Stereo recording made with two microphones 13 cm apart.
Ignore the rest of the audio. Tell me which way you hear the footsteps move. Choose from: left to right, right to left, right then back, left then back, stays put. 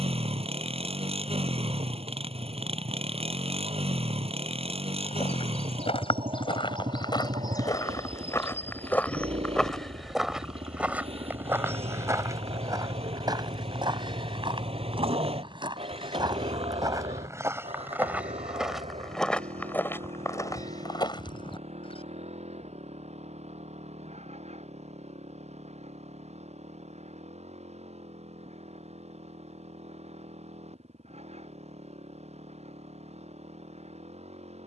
right then back.